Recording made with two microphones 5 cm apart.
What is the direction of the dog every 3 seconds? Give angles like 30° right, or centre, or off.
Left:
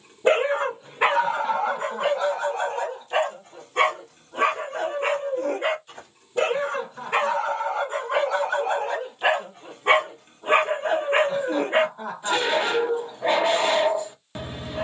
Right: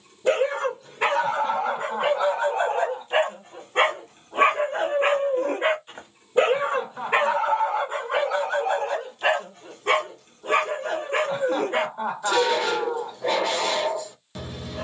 centre, 30° right, 10° right, 30° left, 30° left.